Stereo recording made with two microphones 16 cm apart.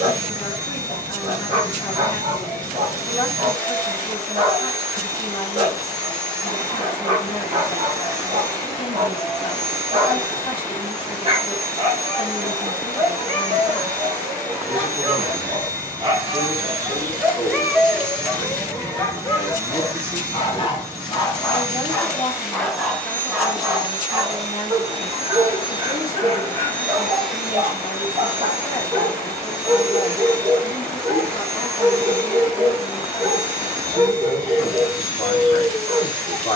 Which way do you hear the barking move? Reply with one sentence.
You can hear the barking move from right to left and back again.